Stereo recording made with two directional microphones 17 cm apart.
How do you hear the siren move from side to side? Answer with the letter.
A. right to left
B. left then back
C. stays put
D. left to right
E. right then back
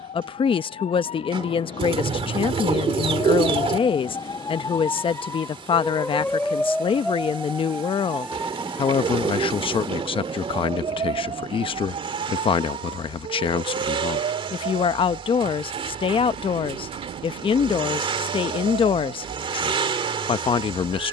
D.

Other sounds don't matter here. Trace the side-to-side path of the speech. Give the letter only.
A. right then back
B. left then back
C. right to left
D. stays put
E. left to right
D.